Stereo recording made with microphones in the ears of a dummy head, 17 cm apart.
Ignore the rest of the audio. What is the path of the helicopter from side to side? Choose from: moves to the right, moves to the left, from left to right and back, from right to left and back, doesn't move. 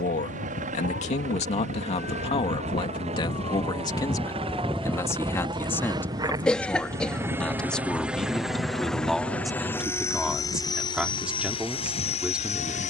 moves to the left.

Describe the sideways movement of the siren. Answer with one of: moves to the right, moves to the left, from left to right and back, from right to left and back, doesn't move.
moves to the right.